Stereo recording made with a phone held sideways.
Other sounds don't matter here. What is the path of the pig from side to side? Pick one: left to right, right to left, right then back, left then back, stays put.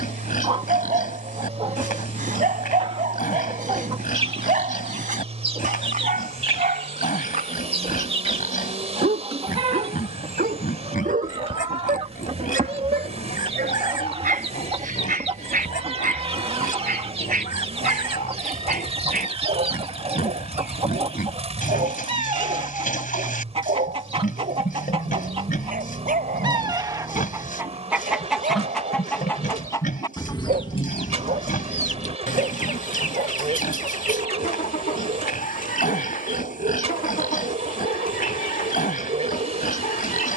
stays put.